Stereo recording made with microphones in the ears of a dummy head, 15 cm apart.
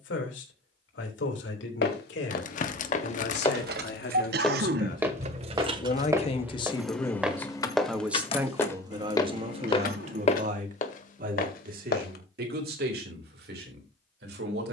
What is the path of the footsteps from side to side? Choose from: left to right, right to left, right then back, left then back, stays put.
right then back.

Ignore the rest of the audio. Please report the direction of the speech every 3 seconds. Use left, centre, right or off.
left, left, centre, right, right.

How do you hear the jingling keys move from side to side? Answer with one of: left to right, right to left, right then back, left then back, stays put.
right to left.